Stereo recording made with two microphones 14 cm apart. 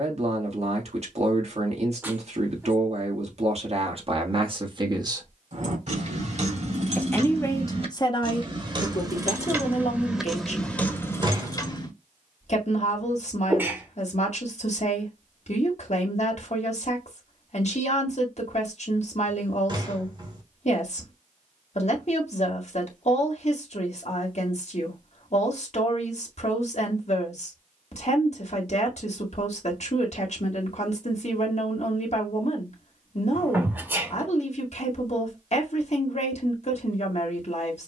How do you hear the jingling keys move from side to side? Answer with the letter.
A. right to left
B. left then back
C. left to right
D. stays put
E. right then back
A.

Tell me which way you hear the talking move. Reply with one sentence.
You can hear the talking move from right to left.